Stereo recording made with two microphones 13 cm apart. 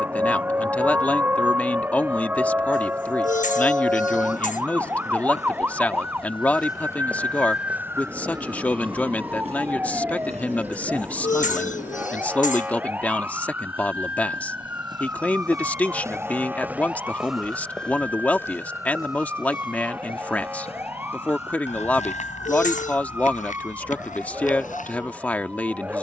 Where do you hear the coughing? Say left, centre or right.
left.